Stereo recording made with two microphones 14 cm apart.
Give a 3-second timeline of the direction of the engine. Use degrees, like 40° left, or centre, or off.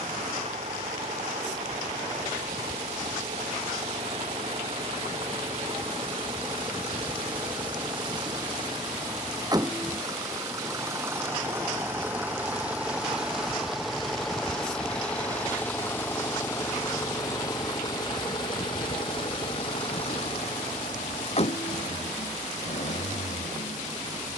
50° right, 40° right, 40° right, 20° right, centre, 20° left, 40° left, 50° left.